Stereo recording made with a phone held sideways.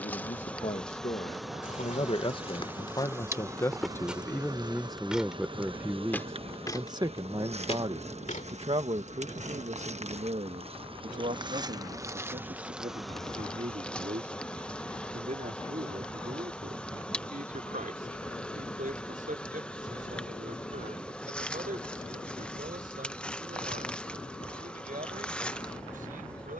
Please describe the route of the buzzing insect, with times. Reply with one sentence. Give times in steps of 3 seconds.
In this clip you hear the buzzing insect in the centre from 0 s, on the right from 3 s and in the centre from 12 s.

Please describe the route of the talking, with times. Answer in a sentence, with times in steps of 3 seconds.
In this clip you hear the talking on the left from 0 s, in the centre from 3 s and on the right from 6 s.